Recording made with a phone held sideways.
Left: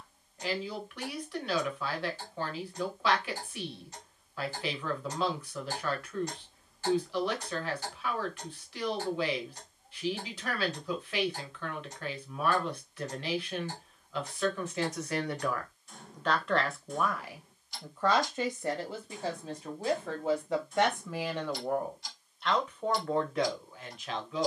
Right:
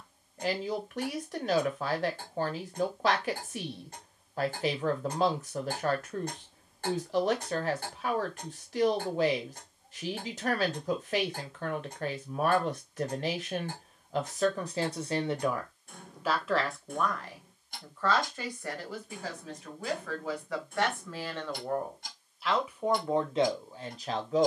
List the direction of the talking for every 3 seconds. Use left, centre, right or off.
right, right, right, right, right, centre, left, centre.